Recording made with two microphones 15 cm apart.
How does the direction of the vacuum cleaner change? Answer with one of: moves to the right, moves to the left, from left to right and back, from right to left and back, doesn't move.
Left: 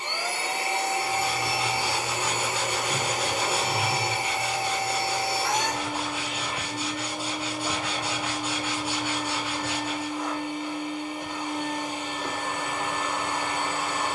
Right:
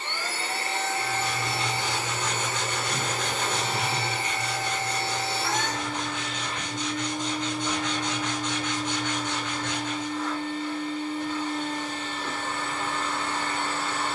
doesn't move.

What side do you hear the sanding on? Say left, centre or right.
centre.